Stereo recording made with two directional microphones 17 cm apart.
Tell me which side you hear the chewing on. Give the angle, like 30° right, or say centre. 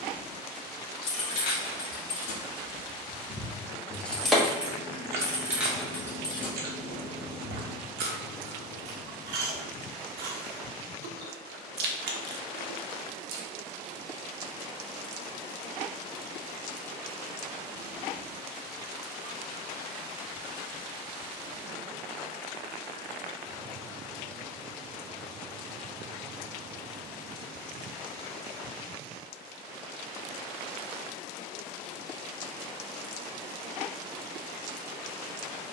70° right.